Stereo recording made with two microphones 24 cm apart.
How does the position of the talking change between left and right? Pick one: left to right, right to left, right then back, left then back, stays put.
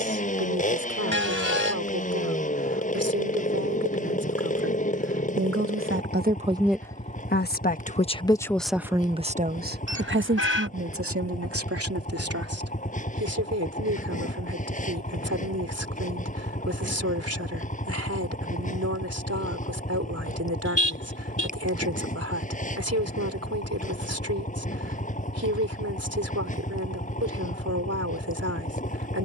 left then back.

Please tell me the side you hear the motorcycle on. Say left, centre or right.
left.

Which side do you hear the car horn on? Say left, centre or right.
left.